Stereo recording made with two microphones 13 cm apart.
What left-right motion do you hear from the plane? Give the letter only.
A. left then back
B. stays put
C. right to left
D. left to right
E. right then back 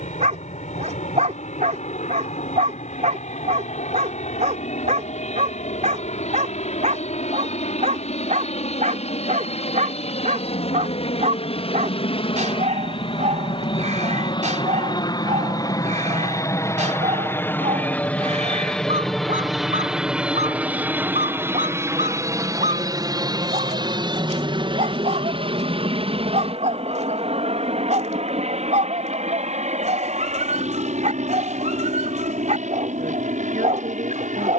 D.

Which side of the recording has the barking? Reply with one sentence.
You can hear the barking on the right.